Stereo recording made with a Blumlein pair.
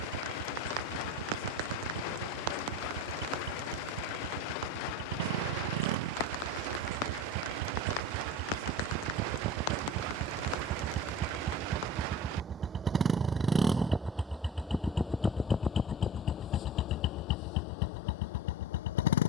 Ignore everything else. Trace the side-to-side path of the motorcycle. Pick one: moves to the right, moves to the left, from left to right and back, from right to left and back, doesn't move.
moves to the left.